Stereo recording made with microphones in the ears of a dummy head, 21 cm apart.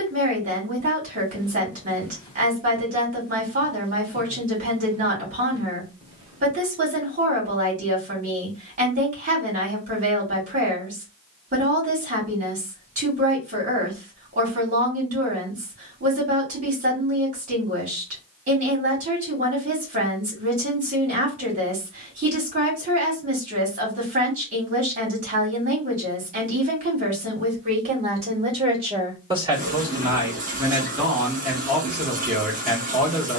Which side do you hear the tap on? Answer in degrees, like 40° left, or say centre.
40° right.